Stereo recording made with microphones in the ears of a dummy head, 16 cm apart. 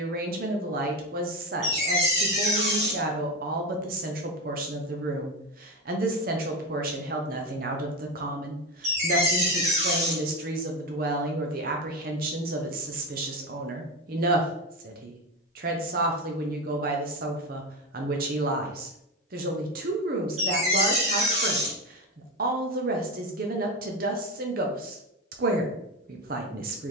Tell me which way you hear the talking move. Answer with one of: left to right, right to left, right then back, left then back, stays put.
stays put.